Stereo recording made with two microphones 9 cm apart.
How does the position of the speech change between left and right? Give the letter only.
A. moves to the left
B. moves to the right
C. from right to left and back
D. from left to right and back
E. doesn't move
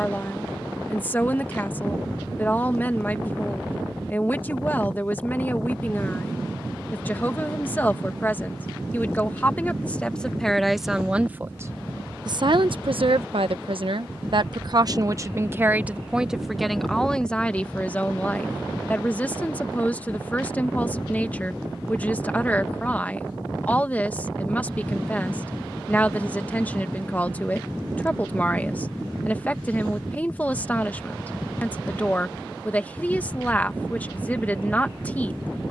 D.